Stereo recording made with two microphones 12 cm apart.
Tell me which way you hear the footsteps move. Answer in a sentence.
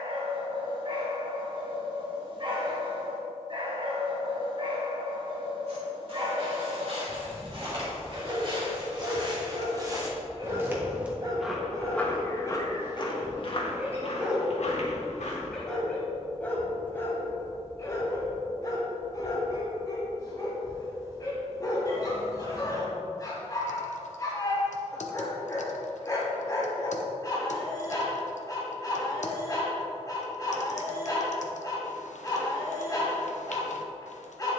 In this clip you hear the footsteps travel towards the left.